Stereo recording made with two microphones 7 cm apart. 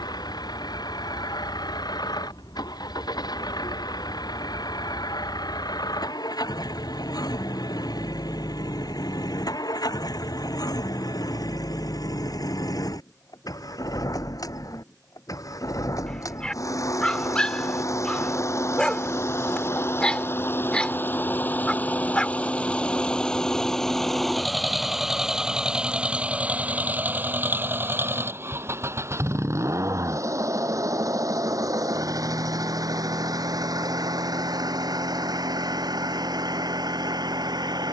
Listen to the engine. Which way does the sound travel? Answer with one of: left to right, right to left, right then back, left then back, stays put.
left to right.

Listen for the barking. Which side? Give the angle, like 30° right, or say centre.
10° left.